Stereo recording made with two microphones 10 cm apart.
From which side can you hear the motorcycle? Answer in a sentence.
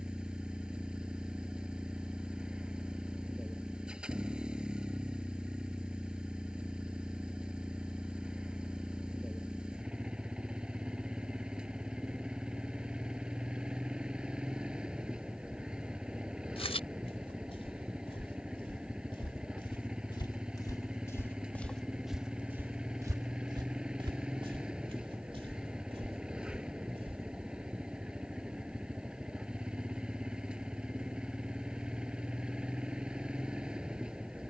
In this clip you hear the motorcycle in the centre.